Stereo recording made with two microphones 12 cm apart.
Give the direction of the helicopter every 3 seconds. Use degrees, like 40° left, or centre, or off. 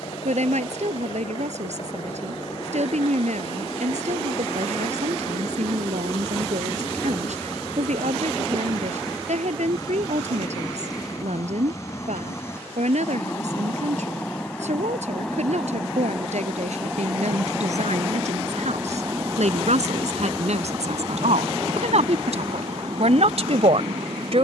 50° left, 50° left, 40° left, 30° left, 20° left, centre, 30° right, 40° right.